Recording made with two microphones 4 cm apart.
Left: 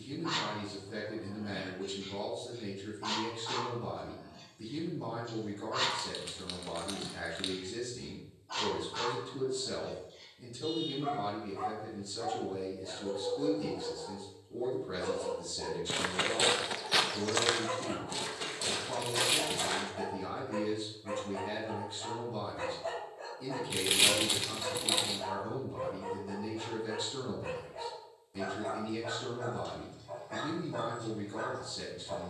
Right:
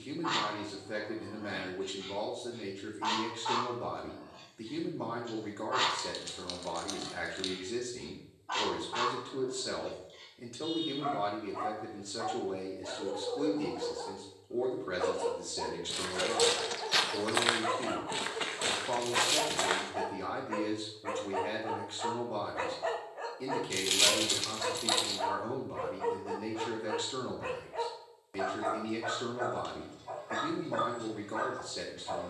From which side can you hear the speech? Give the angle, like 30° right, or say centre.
70° right.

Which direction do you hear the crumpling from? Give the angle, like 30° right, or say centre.
20° left.